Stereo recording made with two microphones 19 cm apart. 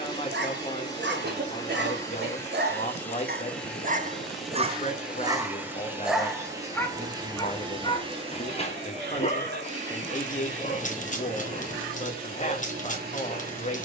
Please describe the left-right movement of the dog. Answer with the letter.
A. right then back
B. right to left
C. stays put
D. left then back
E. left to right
B.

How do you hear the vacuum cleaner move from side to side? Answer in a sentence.
You can hear the vacuum cleaner move from left to right.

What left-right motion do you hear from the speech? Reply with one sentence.
In this clip you hear the speech stay in one place.